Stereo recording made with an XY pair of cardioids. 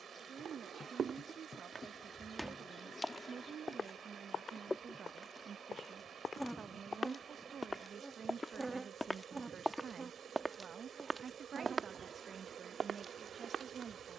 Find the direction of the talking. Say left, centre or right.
right.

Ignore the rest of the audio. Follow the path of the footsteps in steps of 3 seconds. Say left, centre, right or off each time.
right, left, left, centre, right.